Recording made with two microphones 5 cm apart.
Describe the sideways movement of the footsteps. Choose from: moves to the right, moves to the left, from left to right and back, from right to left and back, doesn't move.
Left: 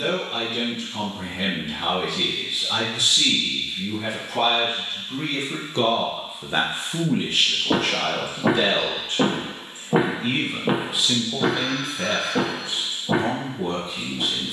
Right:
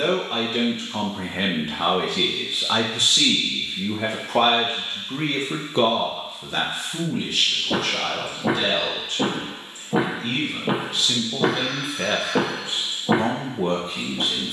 moves to the right.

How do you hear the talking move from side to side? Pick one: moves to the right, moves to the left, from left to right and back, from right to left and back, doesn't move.
from right to left and back.